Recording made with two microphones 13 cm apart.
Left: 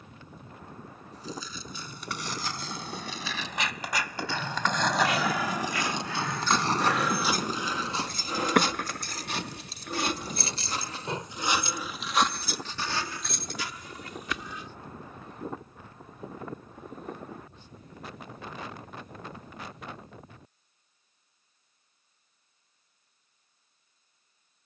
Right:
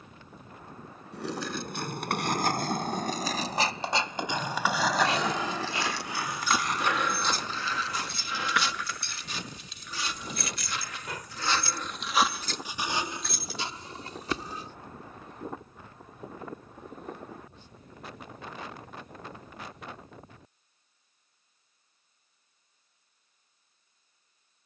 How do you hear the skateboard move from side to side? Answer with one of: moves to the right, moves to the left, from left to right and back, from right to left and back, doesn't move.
moves to the left.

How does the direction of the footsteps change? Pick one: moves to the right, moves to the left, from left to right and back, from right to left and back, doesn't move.
from right to left and back.